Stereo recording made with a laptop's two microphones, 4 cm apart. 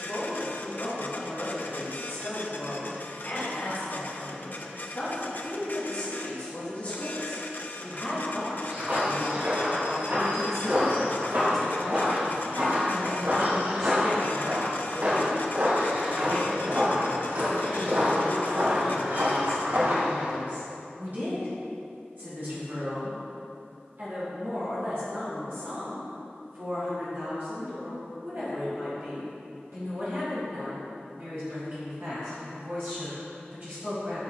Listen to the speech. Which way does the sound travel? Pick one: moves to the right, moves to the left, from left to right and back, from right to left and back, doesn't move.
moves to the right.